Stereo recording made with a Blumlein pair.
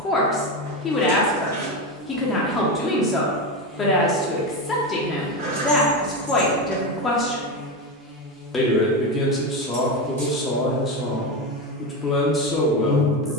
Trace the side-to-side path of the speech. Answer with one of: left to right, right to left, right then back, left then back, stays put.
stays put.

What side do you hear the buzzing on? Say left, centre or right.
centre.